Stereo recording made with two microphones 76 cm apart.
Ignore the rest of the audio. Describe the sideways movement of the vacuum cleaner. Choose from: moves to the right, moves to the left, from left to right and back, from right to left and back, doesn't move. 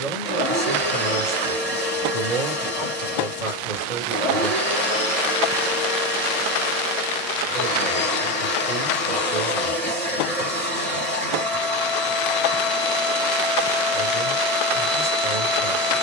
doesn't move.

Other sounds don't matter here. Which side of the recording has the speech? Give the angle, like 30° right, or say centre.
70° right.